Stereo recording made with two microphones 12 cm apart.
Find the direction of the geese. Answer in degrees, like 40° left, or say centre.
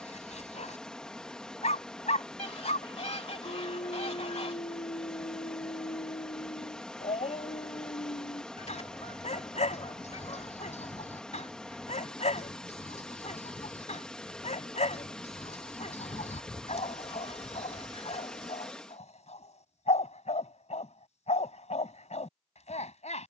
60° left.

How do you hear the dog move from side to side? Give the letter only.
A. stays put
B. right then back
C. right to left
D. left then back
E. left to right
A.